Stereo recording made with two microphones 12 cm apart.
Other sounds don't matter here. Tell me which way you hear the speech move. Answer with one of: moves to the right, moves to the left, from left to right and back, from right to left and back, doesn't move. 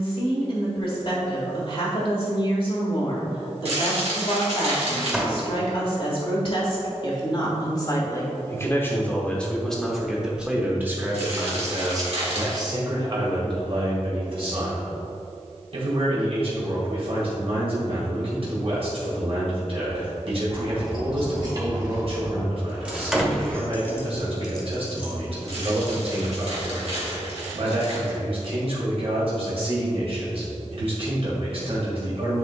moves to the right.